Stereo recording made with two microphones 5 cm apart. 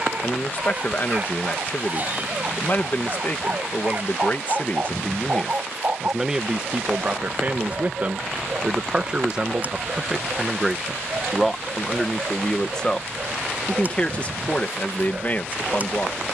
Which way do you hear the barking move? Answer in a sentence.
You can hear the barking stay in one place.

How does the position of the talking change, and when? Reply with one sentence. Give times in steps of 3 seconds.
You can hear the talking on the left from 0 s, on the right from 6 s, in the centre from 9 s and on the left from 12 s.